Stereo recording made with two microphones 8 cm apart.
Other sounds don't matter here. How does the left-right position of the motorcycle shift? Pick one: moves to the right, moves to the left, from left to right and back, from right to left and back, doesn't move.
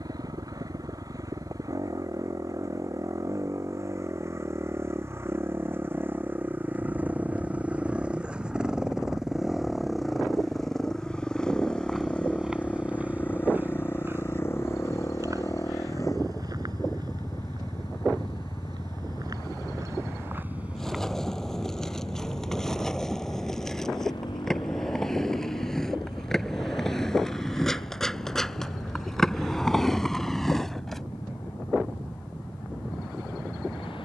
moves to the left.